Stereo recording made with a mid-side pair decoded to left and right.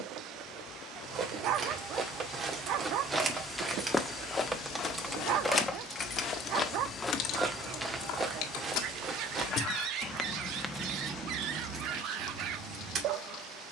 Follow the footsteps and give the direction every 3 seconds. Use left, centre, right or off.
right, left, centre, right, off.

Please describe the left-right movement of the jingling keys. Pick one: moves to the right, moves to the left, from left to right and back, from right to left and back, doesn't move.
from right to left and back.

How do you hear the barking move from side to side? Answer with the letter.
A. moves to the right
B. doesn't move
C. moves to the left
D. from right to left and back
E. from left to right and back
B.